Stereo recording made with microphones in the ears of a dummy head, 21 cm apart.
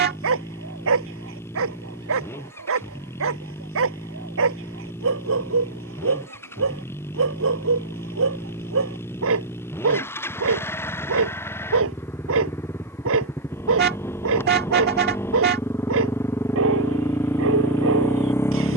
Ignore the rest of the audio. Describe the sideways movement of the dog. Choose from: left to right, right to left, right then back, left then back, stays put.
stays put.